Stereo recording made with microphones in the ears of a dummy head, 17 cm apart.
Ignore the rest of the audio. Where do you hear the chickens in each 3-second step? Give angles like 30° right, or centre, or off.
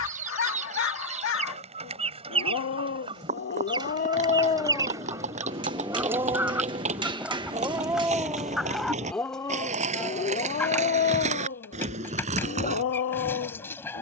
30° right, 20° right, 10° right, 10° left, 10° left.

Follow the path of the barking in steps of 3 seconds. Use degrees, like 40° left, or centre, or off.
80° left, 30° left, 20° right, 40° left, 80° left.